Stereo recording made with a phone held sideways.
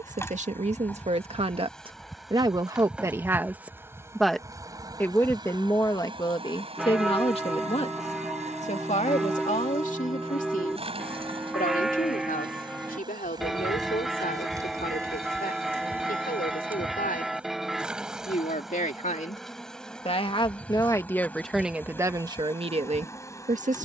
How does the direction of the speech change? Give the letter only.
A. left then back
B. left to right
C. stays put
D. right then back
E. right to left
A.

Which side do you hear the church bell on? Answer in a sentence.
You can hear the church bell in the centre.